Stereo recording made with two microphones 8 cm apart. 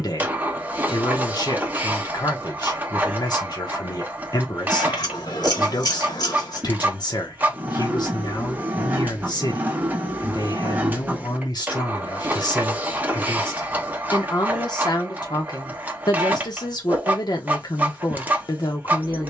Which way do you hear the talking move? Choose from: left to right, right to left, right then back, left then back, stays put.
stays put.